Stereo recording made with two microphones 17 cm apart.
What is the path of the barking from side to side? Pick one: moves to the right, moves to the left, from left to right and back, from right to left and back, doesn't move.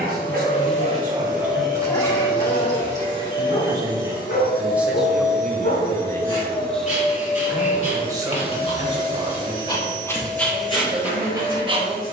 from right to left and back.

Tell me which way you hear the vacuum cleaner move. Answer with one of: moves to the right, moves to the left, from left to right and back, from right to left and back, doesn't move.
doesn't move.